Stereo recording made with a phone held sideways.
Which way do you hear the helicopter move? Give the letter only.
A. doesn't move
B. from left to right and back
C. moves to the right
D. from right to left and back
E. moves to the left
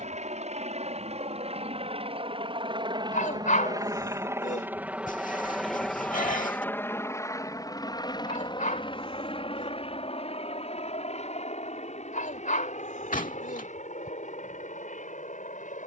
E.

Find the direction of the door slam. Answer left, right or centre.
left.